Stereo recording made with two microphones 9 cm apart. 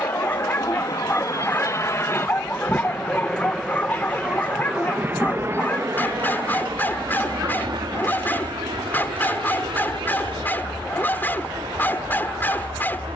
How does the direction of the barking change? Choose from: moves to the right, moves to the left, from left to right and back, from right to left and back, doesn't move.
doesn't move.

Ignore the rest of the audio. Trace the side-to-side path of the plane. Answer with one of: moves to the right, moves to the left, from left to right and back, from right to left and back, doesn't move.
moves to the right.